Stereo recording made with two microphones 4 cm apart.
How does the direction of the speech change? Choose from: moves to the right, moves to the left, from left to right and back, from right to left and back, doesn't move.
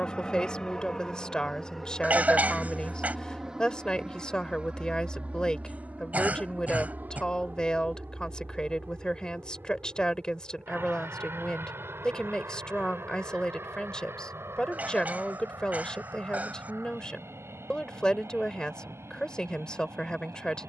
doesn't move.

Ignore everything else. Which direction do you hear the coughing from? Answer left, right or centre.
right.